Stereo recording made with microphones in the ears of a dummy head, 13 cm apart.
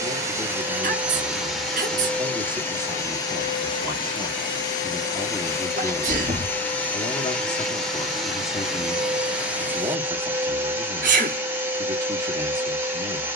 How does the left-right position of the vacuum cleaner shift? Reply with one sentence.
You can hear the vacuum cleaner go left and come back.